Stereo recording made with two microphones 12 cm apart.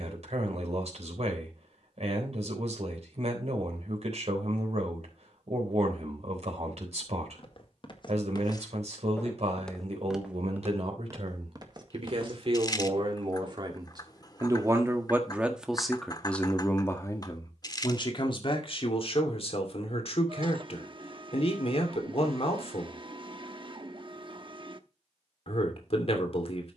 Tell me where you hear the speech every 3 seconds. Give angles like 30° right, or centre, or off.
60° right, 60° right, 60° right, 60° right, 40° right, 10° left, 50° left, 60° left, 60° left.